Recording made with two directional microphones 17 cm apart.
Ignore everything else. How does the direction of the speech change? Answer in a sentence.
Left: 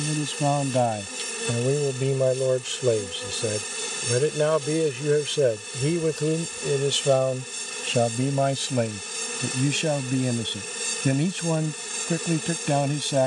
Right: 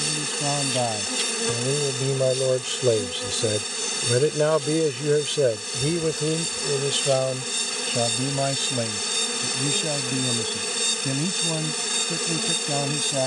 You can hear the speech move from left to right and back again.